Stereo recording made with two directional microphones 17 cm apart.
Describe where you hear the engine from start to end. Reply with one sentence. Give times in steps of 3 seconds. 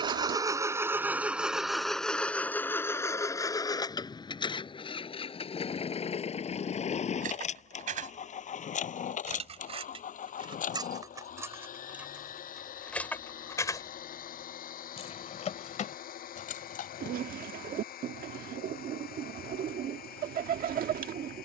In this clip you hear the engine in the centre from 0 s and on the left from 3 s.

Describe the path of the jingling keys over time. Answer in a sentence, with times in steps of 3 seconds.
You can hear the jingling keys not at all from 0 s, on the right from 6 s, in the centre from 12 s, on the left from 15 s and not at all from 18 s.